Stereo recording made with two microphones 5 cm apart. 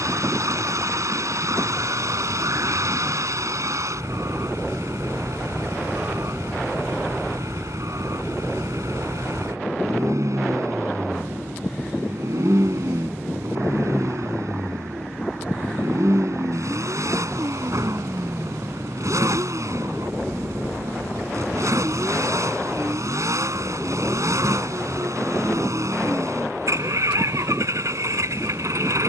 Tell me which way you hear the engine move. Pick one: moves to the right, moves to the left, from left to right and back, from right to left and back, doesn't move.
doesn't move.